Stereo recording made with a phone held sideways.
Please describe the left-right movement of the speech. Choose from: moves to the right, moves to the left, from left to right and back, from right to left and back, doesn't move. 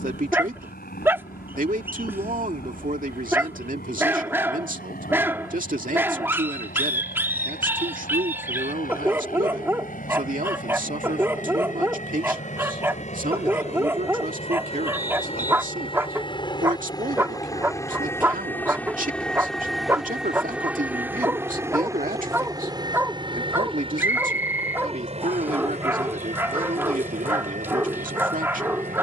doesn't move.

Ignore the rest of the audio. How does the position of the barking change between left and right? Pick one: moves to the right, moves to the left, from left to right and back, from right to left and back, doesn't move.
doesn't move.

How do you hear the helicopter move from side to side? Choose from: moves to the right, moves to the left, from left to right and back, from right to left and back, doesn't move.
moves to the right.